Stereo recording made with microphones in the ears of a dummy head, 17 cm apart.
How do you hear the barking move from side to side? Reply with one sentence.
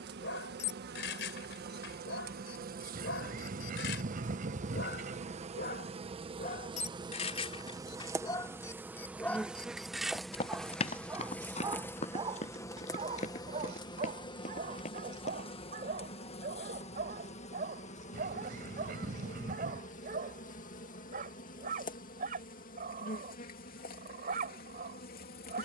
In this clip you hear the barking go from the left side to the right.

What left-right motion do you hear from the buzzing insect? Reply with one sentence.
You can hear the buzzing insect move from right to left.